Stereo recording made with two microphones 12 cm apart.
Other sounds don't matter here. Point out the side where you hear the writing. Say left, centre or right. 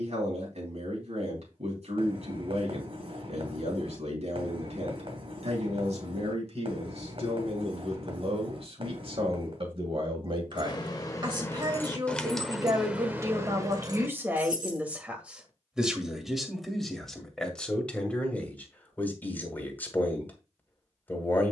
right.